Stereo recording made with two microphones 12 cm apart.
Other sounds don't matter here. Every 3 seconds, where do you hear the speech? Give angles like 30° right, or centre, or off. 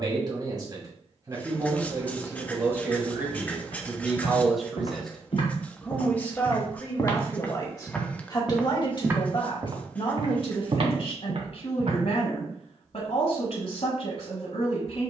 30° right, centre, 30° left, 50° left, 60° left.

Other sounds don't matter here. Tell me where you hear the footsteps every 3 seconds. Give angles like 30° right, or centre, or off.
off, 50° left, 20° left, 40° right, off.